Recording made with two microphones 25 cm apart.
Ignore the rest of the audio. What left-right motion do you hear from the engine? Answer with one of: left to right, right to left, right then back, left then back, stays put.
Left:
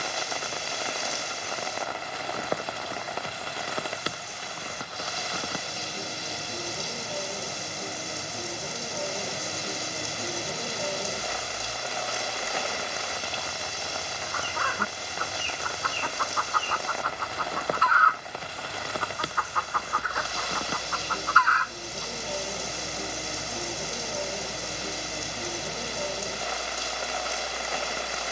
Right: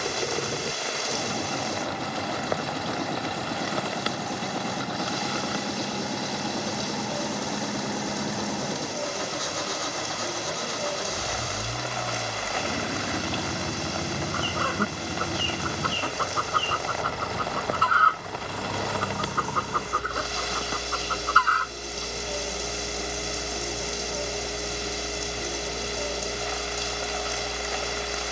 stays put.